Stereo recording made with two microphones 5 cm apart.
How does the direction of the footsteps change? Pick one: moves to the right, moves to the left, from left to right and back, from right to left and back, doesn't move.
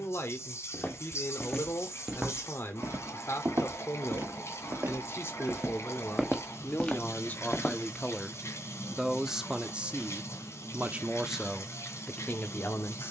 from left to right and back.